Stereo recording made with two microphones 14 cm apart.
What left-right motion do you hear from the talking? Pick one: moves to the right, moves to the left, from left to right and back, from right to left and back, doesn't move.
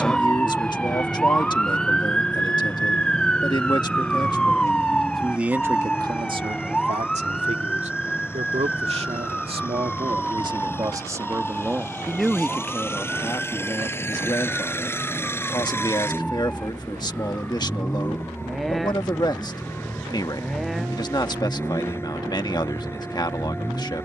from left to right and back.